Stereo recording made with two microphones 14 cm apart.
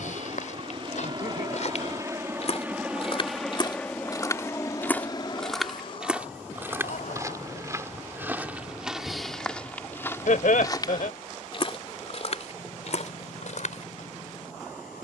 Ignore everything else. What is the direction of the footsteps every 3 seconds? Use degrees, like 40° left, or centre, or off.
60° left, 20° left, 20° right, 20° left, 60° left.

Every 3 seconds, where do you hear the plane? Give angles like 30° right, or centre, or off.
30° right, 20° left, 50° left, 60° left, 70° left.